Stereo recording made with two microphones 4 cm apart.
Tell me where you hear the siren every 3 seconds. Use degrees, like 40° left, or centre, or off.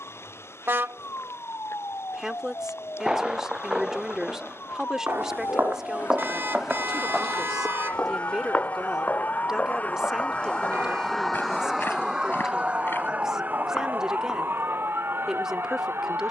80° left, 70° left, 60° left, 20° left, 40° right, 60° right.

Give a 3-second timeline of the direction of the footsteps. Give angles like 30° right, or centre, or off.
off, 50° right, 10° left, 40° left, 50° left, off.